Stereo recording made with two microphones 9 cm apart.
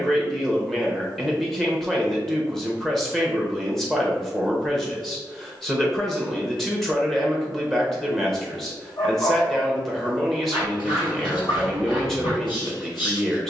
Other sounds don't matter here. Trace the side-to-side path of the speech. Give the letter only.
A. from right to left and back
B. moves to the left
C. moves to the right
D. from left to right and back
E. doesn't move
E.